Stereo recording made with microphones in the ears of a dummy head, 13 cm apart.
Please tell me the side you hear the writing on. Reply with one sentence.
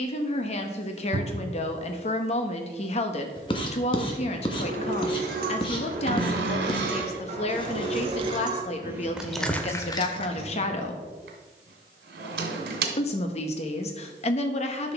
You can hear the writing on the left.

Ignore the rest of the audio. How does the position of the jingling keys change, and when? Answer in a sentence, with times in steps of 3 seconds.
You can hear the jingling keys not at all from 0 s, on the right from 3 s, on the left from 9 s and not at all from 12 s.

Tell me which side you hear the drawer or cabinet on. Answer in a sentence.
You can hear the drawer or cabinet on the right.